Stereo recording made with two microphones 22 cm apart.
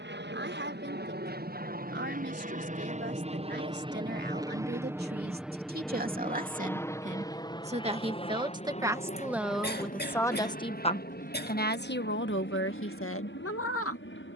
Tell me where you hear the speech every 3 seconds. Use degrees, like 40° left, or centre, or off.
50° right, 50° right, 30° right, 20° left, 60° left.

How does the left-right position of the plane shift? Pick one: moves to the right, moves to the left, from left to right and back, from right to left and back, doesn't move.
moves to the left.